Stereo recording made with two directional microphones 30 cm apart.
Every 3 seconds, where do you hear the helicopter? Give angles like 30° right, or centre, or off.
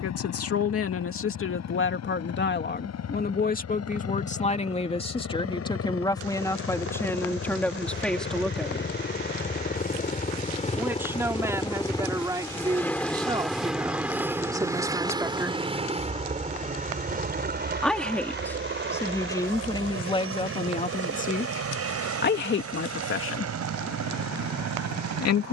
60° left, 50° left, 40° left, 20° left, centre, 20° right, 40° right, 50° right, 60° right.